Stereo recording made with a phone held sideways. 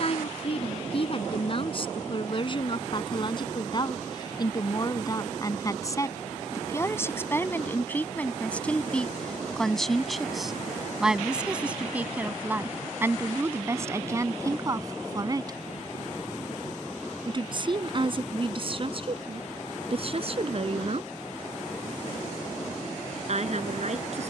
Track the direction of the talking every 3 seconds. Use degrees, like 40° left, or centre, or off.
40° left, 30° left, 10° left, centre, 20° right, 30° right, 40° right, 50° right.